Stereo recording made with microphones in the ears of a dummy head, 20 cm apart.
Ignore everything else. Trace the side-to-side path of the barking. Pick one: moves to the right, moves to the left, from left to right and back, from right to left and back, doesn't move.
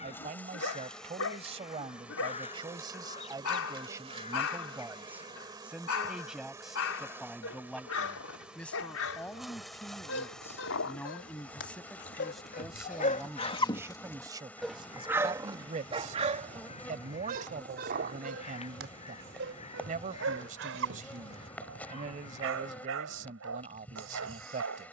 moves to the right.